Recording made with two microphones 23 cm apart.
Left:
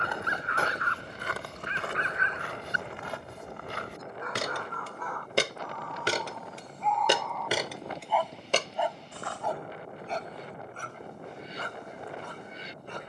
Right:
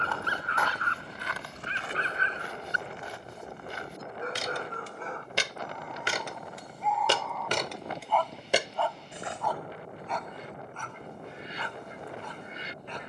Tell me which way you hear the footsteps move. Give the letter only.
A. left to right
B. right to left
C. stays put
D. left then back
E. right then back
D.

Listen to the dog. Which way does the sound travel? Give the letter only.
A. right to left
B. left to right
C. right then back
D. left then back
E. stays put
A.